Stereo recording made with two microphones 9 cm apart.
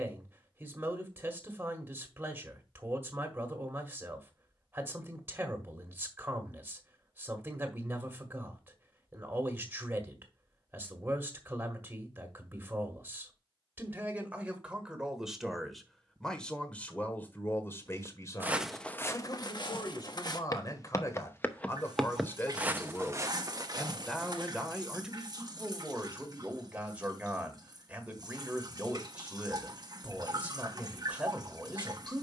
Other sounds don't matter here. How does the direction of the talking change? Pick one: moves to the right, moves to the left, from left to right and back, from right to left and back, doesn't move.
from right to left and back.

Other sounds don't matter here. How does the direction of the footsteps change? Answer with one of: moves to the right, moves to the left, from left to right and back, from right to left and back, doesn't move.
from right to left and back.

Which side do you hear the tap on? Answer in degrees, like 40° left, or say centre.
50° right.